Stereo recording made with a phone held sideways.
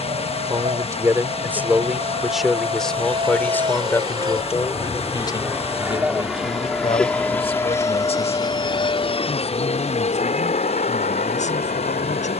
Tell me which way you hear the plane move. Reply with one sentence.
You can hear the plane move to the left.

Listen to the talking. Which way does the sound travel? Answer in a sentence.
In this clip you hear the talking go from the right side to the left.